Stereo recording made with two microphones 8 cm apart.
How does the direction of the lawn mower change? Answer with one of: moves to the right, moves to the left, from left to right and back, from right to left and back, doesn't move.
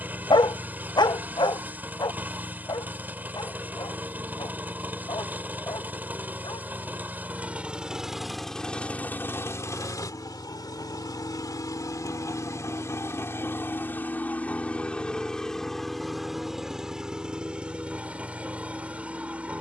from right to left and back.